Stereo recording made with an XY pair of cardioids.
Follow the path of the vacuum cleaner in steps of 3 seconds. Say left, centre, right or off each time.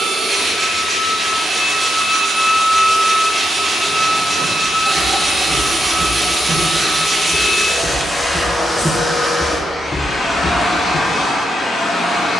right, right, centre, left.